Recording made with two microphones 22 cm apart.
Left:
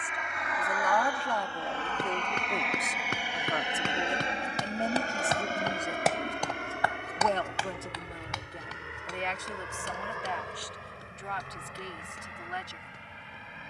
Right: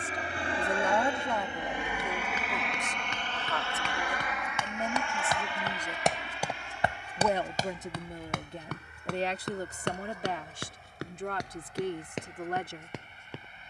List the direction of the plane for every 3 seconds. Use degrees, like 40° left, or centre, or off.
20° right, 30° left, 60° left, 70° left, 80° left.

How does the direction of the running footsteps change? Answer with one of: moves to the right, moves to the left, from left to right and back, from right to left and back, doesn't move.
moves to the right.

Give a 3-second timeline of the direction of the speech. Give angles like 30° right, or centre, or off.
centre, 20° left, 20° right, 40° right, 50° right.